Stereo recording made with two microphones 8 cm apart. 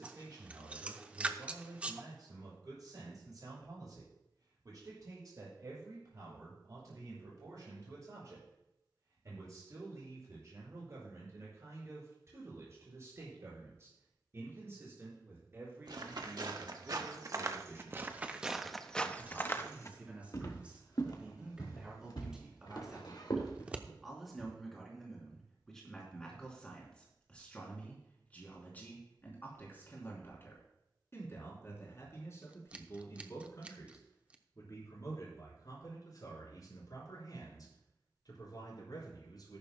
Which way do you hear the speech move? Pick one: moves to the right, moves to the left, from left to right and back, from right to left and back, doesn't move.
moves to the left.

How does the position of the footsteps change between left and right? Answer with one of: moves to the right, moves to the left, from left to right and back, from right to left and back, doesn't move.
moves to the left.